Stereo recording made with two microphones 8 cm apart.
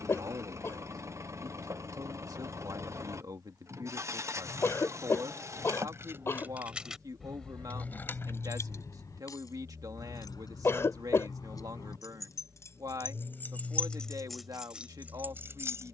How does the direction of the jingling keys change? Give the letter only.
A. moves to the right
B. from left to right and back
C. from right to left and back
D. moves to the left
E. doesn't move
C.